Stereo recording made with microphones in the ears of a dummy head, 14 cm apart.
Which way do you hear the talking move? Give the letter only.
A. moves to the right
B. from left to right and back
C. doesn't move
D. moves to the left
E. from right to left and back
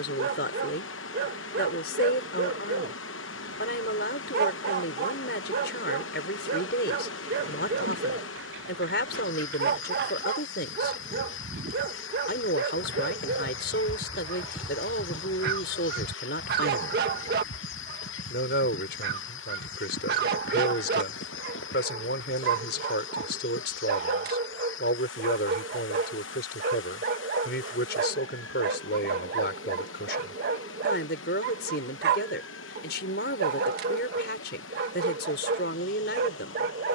C.